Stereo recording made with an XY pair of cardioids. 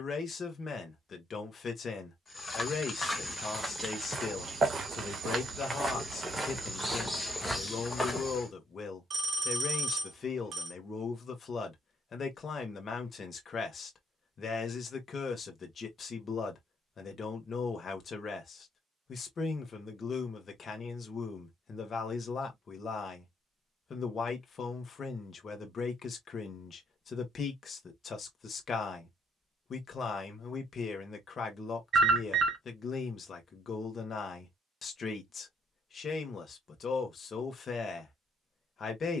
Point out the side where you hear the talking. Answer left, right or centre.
left.